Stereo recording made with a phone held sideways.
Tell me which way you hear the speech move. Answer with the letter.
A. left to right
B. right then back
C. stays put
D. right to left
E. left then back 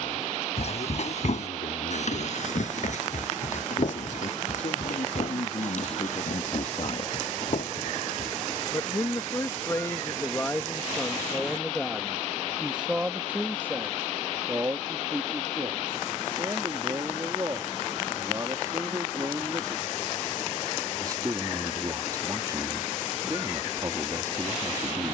A.